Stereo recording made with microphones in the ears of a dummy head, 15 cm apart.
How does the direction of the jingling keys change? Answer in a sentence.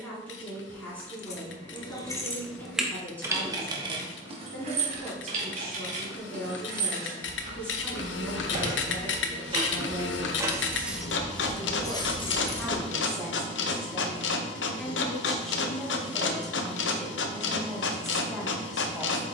In this clip you hear the jingling keys move from left to right and back again.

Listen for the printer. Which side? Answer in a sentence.
You can hear the printer on the left.